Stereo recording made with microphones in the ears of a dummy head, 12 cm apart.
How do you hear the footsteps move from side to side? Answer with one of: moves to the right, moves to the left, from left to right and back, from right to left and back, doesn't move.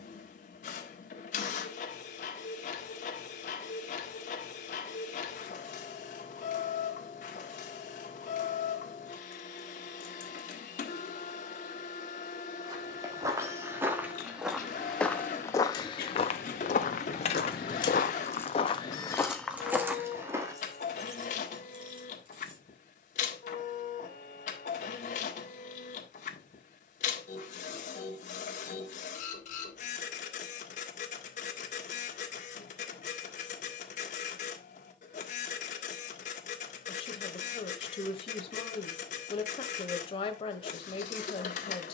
from right to left and back.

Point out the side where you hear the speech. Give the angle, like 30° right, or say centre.
40° left.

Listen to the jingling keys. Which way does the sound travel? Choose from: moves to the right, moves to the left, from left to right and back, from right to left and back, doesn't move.
moves to the right.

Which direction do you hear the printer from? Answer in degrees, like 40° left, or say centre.
60° left.